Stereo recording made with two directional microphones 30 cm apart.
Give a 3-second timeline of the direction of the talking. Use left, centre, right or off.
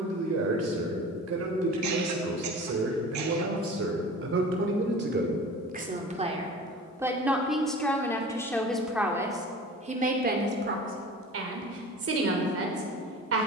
right, right, centre, right, right.